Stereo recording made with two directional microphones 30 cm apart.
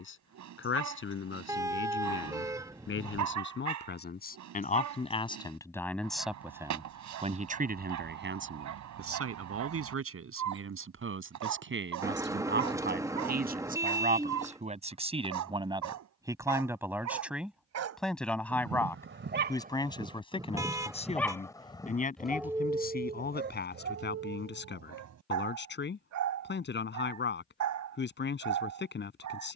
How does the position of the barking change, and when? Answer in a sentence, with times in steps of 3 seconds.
You can hear the barking on the right from 0 s, in the centre from 21 s and on the right from 24 s.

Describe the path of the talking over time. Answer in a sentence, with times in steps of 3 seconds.
In this clip you hear the talking on the left from 0 s, on the right from 6 s, in the centre from 15 s and on the left from 21 s.